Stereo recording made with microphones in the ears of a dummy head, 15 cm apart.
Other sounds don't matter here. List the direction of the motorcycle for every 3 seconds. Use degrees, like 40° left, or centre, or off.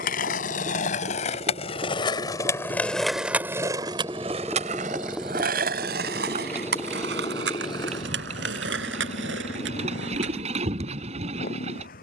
40° right, 10° right, 20° left, 50° left.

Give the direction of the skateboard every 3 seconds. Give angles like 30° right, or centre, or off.
40° left, 40° right, 70° right, 80° right.